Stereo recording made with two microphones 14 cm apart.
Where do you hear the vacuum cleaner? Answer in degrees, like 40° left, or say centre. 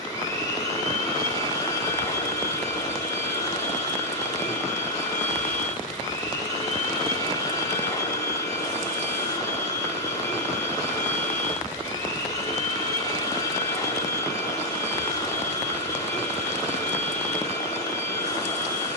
20° left.